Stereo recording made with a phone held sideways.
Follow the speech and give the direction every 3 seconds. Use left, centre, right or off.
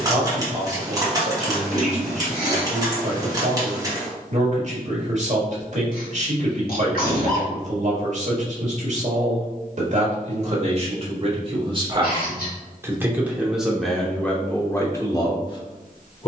right, right, right, right, centre, left.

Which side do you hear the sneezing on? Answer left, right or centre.
left.